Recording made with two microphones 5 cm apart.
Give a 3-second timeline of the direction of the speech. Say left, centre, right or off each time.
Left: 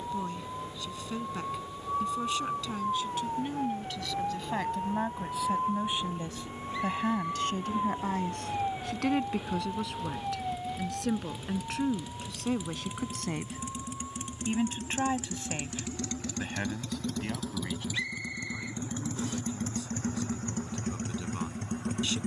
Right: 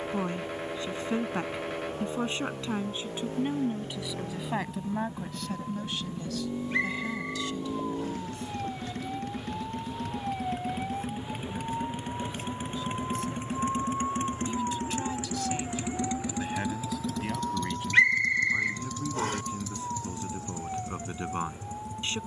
right, centre, left, left, left, centre, right, right.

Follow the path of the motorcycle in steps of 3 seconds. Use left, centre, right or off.
right, right, right, right, right, centre, left, left.